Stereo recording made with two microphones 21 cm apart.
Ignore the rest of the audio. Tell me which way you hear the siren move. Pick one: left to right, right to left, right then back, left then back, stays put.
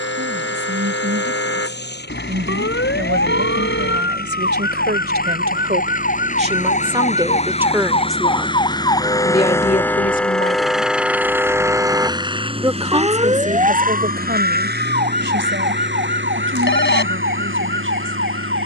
left to right.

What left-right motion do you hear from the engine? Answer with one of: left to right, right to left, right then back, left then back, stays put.
left to right.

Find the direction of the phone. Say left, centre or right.
left.